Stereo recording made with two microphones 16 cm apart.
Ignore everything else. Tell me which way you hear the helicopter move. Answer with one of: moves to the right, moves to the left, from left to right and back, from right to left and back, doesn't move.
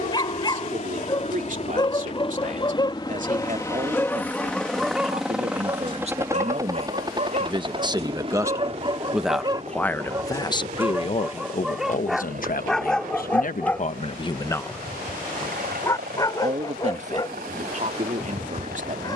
moves to the right.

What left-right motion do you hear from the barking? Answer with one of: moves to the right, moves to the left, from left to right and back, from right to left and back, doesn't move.
from left to right and back.